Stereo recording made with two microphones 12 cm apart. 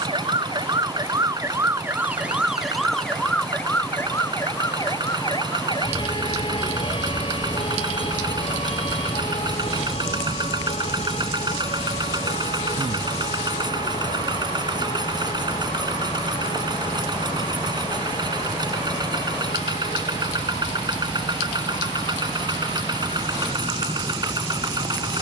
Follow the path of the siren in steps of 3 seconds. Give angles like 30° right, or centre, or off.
20° right, 20° left, 50° left, 60° left, 60° left, 70° left, 70° left, 70° left, 70° left.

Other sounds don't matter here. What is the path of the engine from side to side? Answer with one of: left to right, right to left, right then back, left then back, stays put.
stays put.